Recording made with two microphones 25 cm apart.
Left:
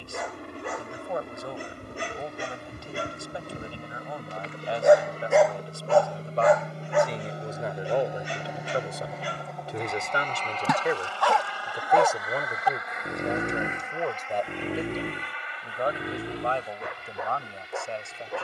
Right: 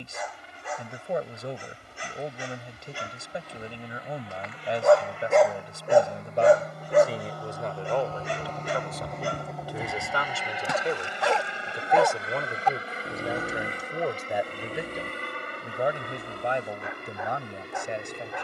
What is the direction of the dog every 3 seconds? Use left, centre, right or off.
left, left, right, right, left, left.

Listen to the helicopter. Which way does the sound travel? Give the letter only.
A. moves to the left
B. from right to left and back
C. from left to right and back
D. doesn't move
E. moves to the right
E.